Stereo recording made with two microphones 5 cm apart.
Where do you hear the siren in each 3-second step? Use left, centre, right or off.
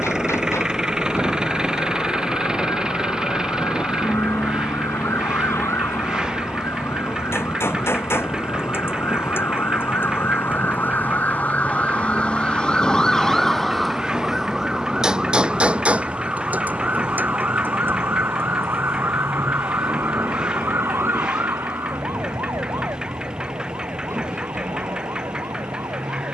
left, left, left, left, centre, right, right, right, right.